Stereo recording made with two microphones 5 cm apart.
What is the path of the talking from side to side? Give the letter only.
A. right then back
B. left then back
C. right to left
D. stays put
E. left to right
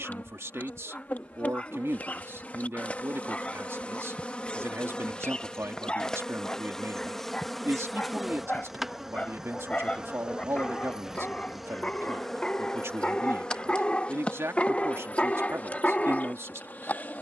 D.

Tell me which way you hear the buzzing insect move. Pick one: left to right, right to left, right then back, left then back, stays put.
right then back.